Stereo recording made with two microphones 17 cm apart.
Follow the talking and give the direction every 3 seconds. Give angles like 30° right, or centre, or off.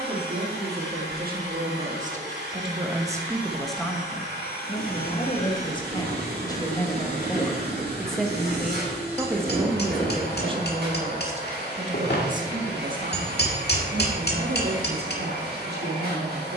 60° right, 10° left, 10° left, 30° right, 60° right, 70° right.